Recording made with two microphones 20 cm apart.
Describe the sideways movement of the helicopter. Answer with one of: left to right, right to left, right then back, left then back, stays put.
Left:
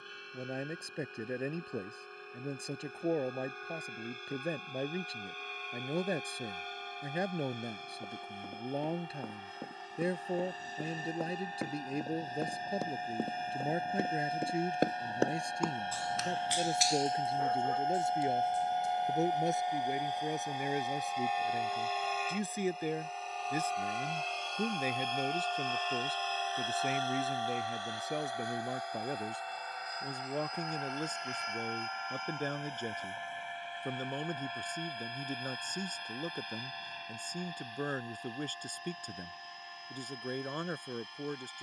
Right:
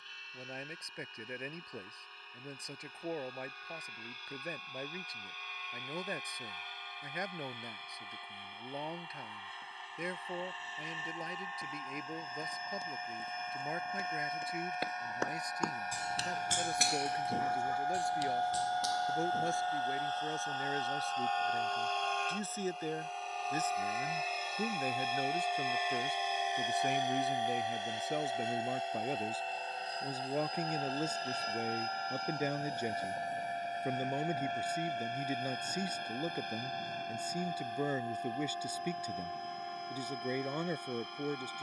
left to right.